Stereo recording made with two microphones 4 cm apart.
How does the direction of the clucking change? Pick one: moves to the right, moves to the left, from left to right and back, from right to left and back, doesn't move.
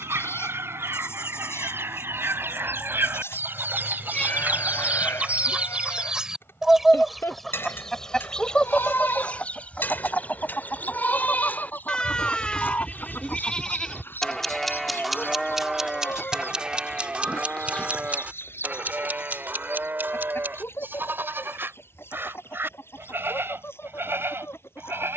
moves to the left.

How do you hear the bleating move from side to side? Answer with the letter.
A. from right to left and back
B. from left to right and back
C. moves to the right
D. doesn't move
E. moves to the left
C.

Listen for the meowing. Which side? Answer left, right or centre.
left.